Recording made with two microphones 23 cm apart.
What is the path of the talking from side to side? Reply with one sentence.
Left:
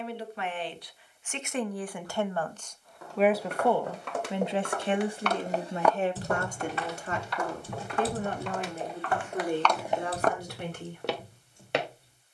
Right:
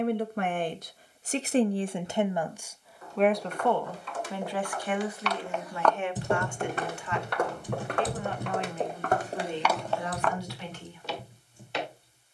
In this clip you hear the talking travel towards the left.